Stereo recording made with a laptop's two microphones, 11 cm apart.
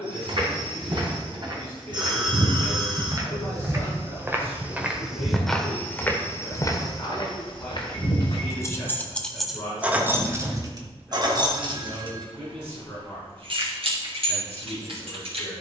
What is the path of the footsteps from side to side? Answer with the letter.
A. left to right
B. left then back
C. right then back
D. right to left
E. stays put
D.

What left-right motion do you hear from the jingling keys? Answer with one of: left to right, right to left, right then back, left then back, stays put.
left to right.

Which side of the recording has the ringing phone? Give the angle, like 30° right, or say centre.
50° right.